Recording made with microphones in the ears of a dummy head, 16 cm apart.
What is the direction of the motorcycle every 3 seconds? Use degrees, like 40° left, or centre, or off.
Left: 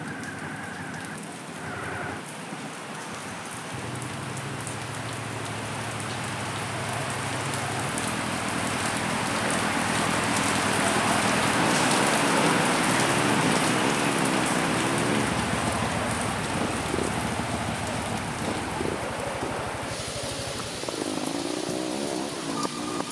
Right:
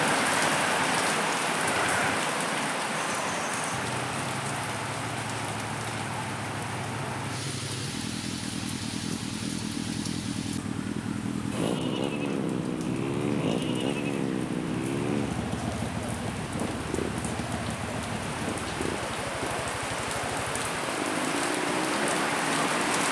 70° right, 70° right, 60° right, 40° right, 10° right, 20° left, 40° left, 60° left.